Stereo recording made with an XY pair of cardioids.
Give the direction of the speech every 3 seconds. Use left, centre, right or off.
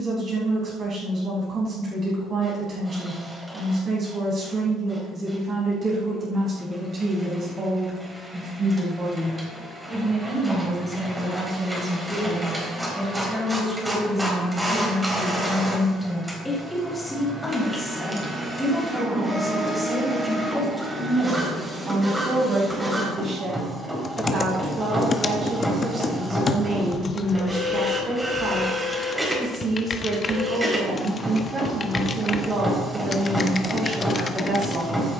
right, right, right, right, centre, centre, centre, right, right, right, right, right.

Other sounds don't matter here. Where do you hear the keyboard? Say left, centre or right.
left.